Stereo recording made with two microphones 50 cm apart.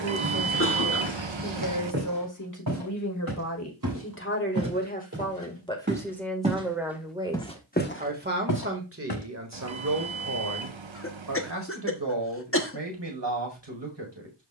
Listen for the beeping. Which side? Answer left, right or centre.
right.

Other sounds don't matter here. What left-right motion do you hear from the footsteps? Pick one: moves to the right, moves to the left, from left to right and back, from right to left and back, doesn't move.
moves to the left.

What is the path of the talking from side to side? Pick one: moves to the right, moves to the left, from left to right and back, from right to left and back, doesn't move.
moves to the right.